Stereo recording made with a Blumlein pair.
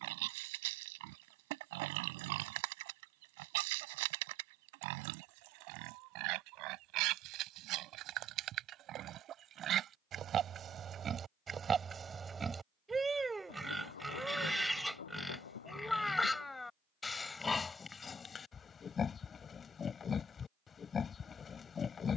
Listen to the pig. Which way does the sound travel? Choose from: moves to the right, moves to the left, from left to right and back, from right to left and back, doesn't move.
moves to the left.